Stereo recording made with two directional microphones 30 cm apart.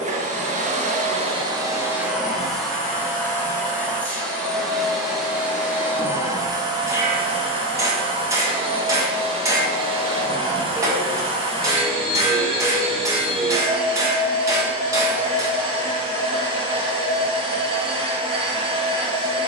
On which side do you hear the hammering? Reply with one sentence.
In this clip you hear the hammering in the centre.